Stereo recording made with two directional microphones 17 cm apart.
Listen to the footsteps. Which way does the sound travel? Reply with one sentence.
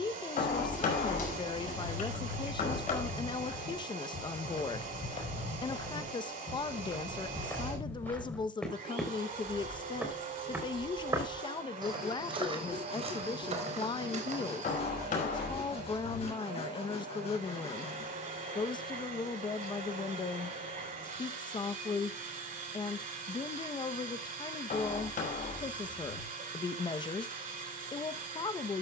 You can hear the footsteps move from left to right.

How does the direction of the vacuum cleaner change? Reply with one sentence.
In this clip you hear the vacuum cleaner stay in one place.